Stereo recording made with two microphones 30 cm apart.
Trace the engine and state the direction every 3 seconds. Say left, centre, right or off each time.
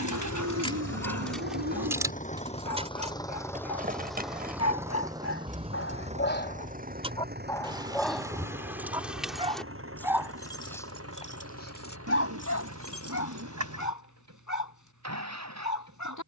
left, centre, right, right, right, right.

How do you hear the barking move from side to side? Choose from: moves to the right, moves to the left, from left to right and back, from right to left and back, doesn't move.
from left to right and back.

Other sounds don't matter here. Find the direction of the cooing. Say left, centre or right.
right.